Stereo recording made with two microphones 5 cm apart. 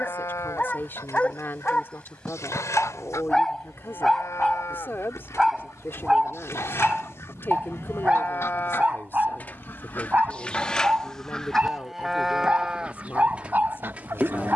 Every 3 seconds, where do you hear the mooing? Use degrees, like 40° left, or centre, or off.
80° left, 70° left, 50° left, 20° left, 20° right.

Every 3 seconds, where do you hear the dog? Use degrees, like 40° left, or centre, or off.
20° left, centre, 20° right, 30° right, 30° right.